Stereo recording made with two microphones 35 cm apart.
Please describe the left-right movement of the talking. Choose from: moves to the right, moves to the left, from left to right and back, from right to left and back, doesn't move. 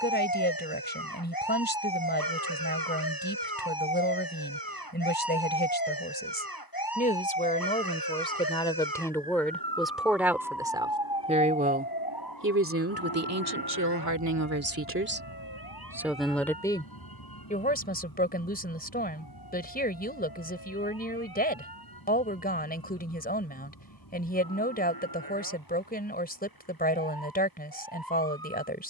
from left to right and back.